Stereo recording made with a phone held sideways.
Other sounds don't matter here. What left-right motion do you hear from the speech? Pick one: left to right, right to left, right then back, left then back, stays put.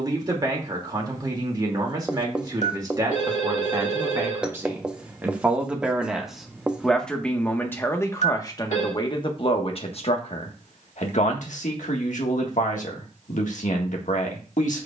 right to left.